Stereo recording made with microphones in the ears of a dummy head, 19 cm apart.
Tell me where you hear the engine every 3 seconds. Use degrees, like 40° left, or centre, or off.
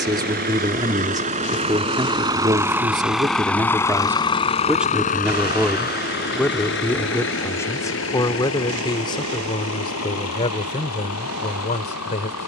30° right, 20° left, 60° left, 70° left.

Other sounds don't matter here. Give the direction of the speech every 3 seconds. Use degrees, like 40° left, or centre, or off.
20° right, 10° right, 10° left, 30° left.